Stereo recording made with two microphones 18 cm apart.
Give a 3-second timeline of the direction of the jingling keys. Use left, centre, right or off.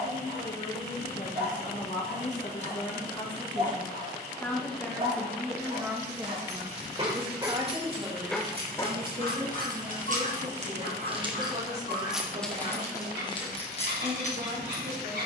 off, off, right, right, left.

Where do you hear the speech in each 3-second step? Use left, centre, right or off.
left, centre, right, right, right.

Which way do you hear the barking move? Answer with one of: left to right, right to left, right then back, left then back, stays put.
right to left.